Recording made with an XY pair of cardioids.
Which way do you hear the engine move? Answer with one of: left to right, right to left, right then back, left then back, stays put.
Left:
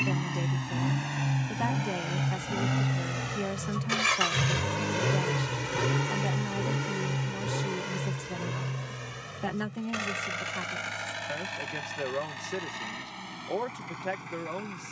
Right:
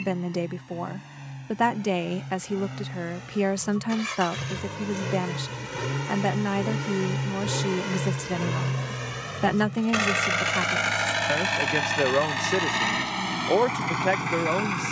left to right.